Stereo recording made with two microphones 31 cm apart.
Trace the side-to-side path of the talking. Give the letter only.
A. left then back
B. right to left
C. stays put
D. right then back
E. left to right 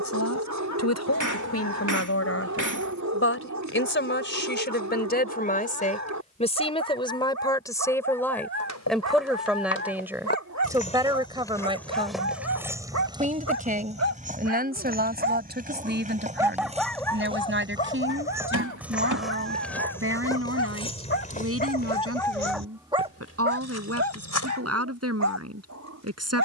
E.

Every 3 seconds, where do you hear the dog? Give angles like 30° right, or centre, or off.
60° right, 60° right, 60° right, 60° right, 60° right, centre, 40° left, centre, 60° right.